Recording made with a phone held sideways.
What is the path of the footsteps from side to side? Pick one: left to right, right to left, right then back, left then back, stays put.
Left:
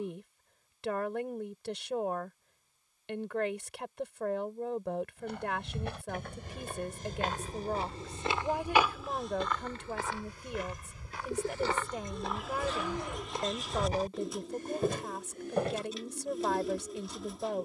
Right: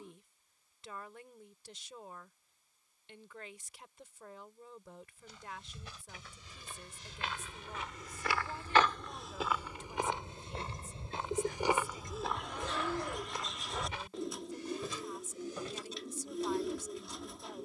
right then back.